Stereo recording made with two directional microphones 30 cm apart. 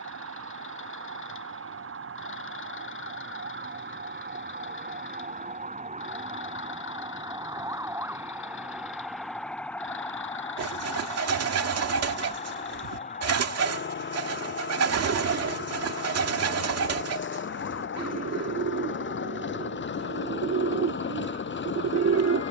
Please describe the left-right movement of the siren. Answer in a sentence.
You can hear the siren travel towards the left.